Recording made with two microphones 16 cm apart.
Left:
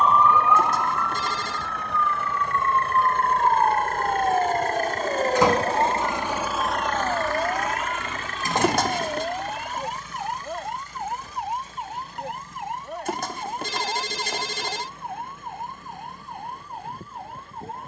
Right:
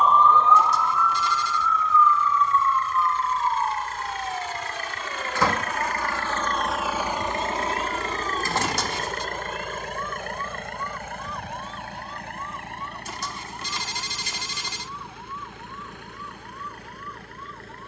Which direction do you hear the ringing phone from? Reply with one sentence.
You can hear the ringing phone on the left.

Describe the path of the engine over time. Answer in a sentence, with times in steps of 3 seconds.
You can hear the engine on the left from 0 s and on the right from 6 s.